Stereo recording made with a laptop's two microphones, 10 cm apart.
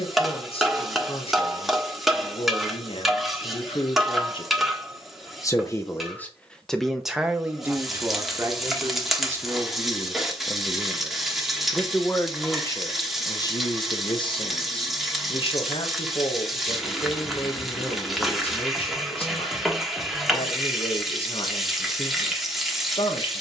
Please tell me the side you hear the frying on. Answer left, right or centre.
centre.